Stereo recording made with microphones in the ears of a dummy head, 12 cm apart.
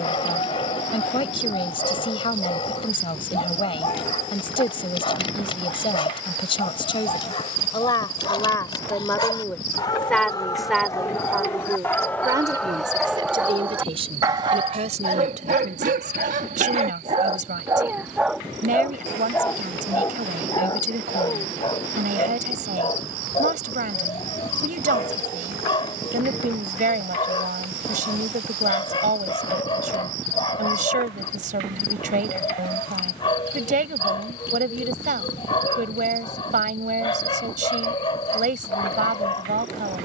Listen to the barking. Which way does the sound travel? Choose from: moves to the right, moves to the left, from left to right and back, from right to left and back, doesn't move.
from left to right and back.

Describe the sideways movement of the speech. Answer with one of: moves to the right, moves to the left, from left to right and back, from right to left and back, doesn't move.
moves to the right.